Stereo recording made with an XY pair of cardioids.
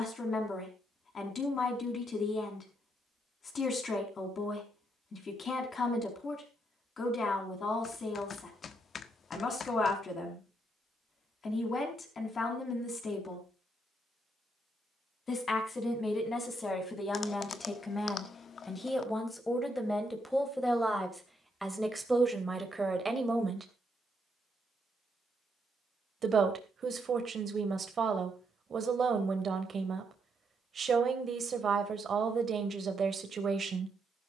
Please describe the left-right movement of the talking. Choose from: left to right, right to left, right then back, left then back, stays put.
left to right.